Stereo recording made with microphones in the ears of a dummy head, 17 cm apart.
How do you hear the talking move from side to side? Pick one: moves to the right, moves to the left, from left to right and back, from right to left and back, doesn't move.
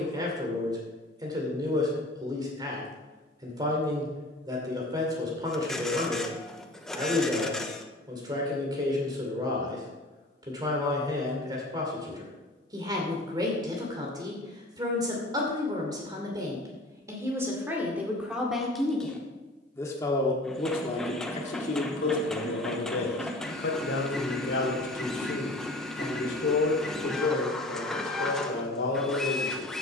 moves to the left.